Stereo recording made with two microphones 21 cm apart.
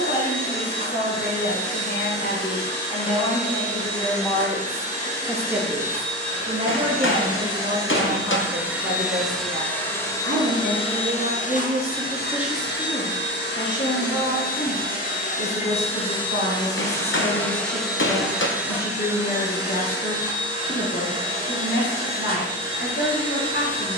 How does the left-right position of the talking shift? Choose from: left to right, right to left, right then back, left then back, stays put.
right then back.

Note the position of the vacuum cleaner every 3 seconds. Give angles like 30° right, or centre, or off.
30° right, 30° right, 20° right, 20° left, 50° left, 20° left, 10° right, 20° right.